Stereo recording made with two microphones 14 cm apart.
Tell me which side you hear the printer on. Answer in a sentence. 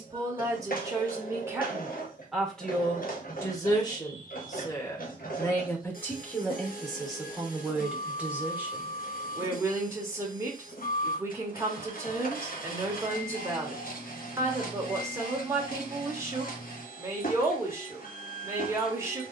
You can hear the printer on the left.